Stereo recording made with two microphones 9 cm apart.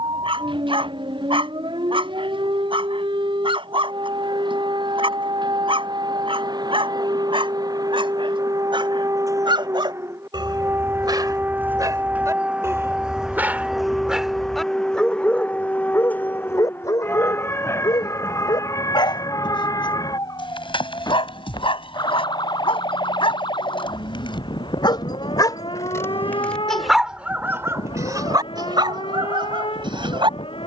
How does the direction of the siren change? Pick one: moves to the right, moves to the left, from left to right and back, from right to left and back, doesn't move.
moves to the left.